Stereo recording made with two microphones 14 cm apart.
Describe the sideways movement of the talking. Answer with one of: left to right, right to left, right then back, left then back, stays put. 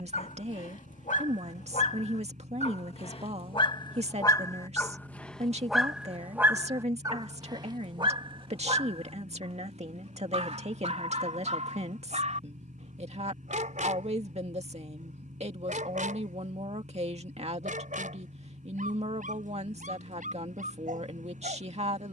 stays put.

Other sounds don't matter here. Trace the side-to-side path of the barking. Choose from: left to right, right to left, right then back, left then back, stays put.
left to right.